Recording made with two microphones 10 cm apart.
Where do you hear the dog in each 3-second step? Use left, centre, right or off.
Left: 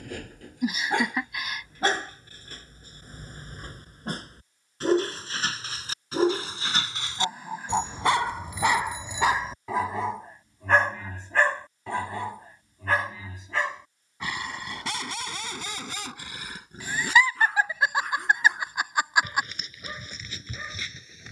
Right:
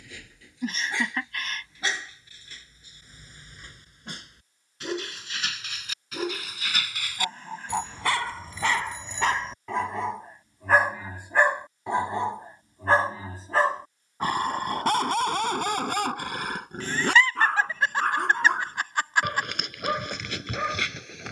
left, left, left, centre, right, right, right.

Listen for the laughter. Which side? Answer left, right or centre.
centre.